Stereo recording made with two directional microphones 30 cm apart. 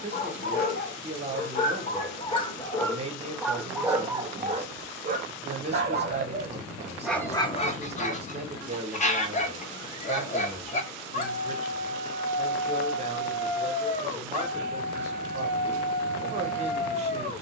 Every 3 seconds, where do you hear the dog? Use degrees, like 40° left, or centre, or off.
20° left, 20° right, 10° left, 20° left, 20° left, 20° left.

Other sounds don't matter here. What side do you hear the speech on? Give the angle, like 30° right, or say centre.
20° right.